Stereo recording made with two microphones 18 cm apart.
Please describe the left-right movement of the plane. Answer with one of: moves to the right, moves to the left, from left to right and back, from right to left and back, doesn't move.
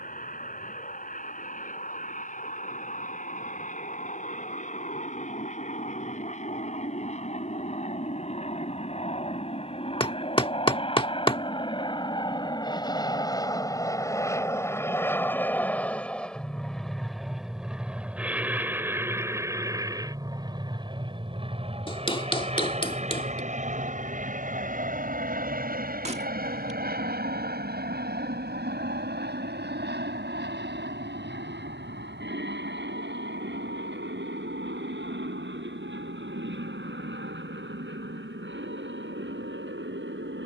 moves to the right.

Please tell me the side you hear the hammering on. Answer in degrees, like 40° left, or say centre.
30° left.